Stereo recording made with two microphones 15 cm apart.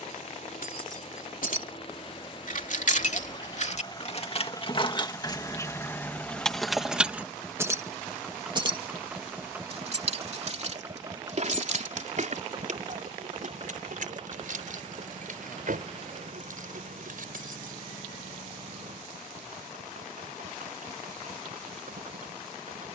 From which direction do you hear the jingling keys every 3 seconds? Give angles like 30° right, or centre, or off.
60° left, 40° left, 10° right, 50° right, 60° right, 70° right, off, off.